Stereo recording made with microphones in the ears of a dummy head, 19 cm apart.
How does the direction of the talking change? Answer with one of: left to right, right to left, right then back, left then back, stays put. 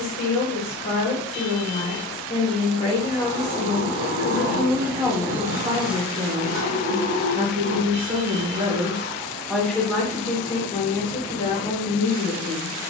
right then back.